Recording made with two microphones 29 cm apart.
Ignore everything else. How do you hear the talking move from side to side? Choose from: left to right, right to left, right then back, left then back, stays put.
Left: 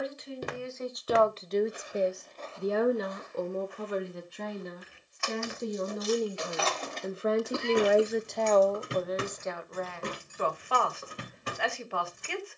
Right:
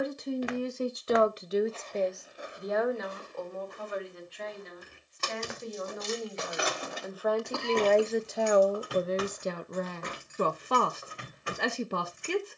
left then back.